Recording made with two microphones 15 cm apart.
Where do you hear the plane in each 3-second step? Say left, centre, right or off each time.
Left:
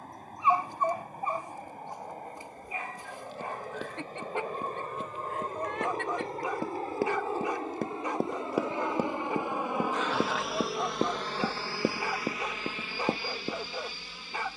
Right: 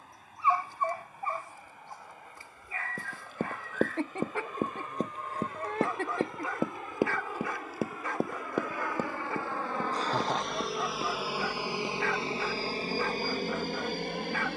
left, left, left, centre, right.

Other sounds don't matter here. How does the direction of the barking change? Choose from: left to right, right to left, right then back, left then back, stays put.
stays put.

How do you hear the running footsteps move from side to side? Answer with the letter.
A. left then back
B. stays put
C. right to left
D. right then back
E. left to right
C.